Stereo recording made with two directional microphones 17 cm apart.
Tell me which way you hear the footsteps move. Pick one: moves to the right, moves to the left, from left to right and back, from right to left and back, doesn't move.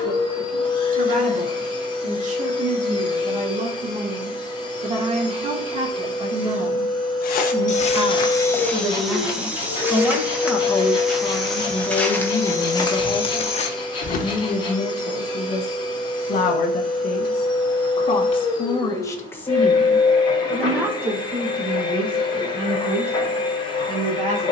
from left to right and back.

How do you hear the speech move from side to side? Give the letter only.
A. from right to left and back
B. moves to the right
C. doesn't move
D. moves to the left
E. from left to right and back
A.